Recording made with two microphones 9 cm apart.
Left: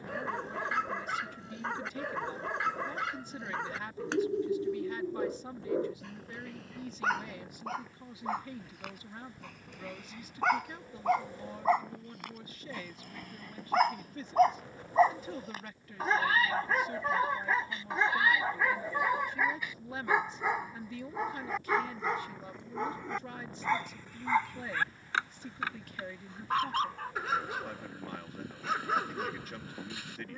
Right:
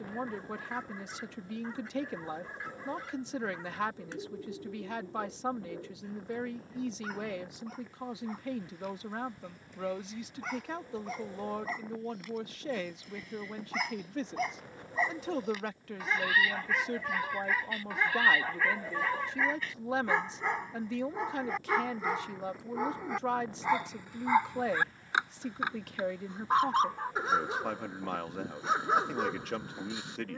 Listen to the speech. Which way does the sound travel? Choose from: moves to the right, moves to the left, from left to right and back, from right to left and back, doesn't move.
doesn't move.